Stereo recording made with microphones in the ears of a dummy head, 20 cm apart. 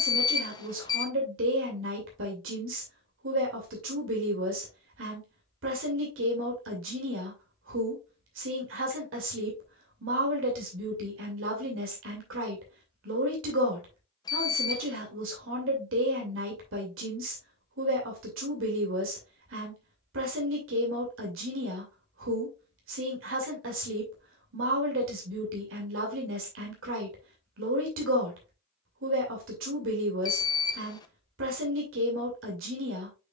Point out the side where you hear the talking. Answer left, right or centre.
right.